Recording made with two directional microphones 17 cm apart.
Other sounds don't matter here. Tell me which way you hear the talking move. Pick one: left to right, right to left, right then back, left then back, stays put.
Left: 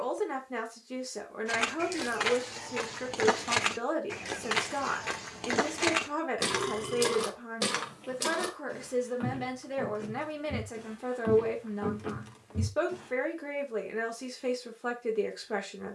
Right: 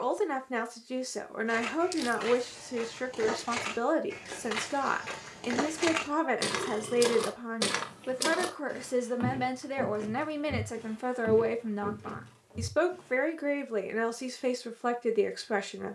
stays put.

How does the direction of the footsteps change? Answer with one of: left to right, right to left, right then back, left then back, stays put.
right then back.